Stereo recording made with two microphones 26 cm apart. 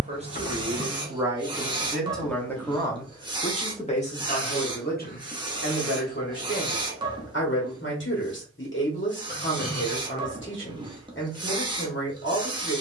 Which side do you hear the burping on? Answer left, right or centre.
left.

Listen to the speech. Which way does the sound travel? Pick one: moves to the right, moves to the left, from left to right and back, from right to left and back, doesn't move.
moves to the left.